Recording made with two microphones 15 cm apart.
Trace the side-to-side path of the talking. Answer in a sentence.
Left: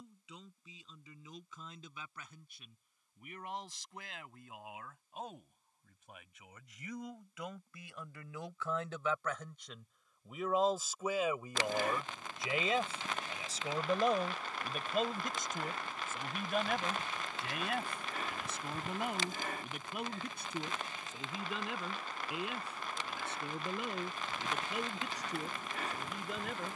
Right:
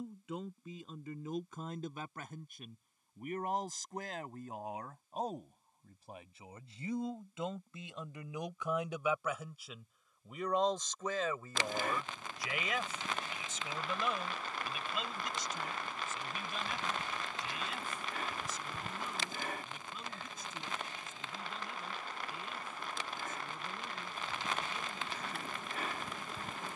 You can hear the talking move to the left.